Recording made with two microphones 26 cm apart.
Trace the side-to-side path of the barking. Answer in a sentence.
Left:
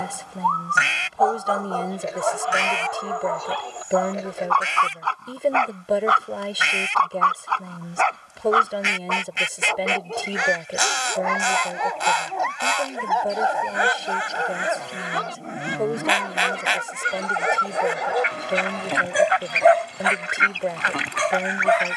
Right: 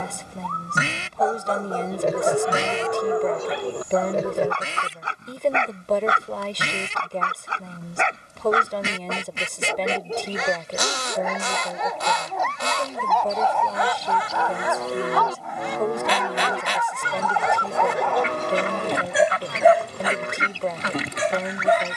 In this clip you hear the barking go left and come back.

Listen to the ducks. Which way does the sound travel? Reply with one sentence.
You can hear the ducks stay in one place.